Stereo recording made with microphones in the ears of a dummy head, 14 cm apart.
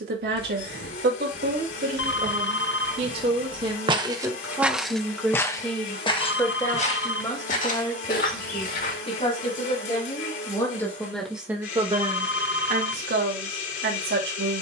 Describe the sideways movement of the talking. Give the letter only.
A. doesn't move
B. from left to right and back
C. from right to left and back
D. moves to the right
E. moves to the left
C.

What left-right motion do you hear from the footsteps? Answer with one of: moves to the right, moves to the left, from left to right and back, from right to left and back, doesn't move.
moves to the left.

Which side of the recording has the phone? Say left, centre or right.
left.